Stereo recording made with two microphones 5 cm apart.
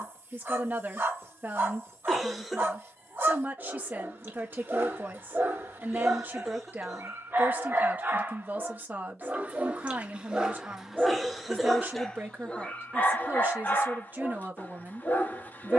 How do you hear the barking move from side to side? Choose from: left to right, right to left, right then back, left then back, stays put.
right to left.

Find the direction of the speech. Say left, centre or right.
right.